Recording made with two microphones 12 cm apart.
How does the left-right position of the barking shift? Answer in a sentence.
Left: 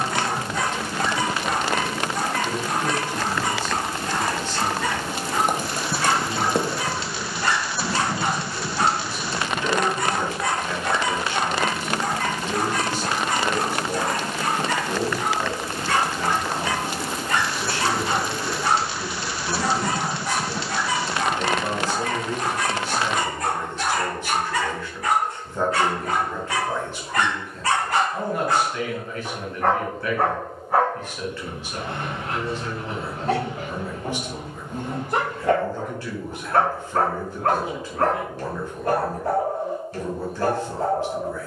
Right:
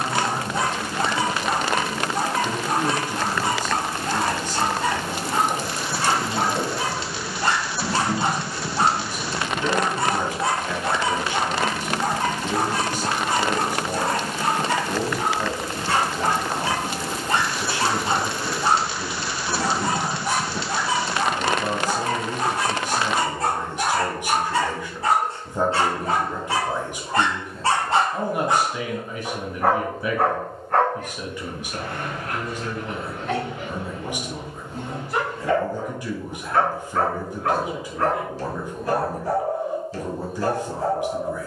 You can hear the barking travel towards the left.